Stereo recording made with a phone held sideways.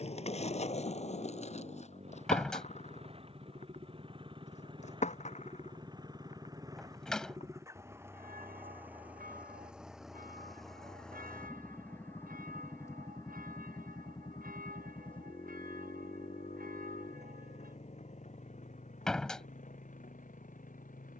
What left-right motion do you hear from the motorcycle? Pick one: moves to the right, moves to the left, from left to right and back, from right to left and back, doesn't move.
moves to the left.